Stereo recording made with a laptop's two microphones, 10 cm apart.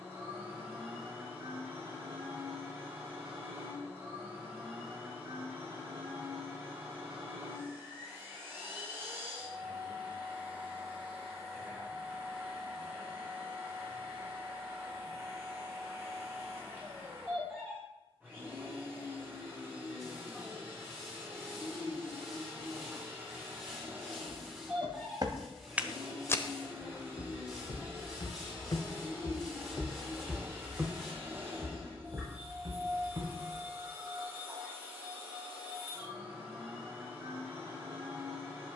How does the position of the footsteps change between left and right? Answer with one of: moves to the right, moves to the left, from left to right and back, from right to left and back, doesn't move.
from right to left and back.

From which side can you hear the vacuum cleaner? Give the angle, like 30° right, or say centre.
20° right.